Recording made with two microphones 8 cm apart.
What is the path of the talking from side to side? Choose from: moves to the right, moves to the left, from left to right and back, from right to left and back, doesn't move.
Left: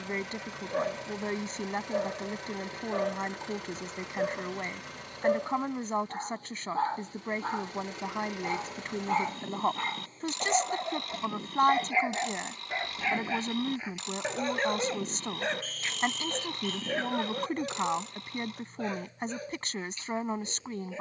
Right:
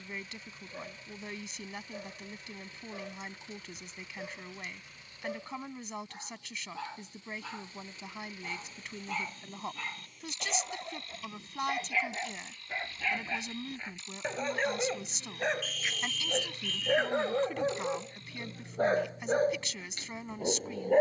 doesn't move.